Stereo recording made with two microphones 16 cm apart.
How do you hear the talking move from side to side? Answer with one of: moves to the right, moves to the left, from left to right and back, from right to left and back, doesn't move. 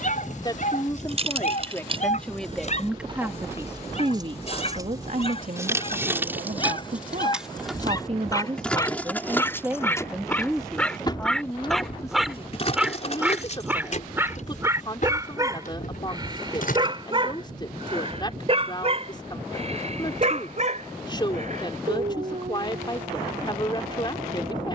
from left to right and back.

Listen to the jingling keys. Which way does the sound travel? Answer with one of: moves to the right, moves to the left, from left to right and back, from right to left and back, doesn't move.
moves to the left.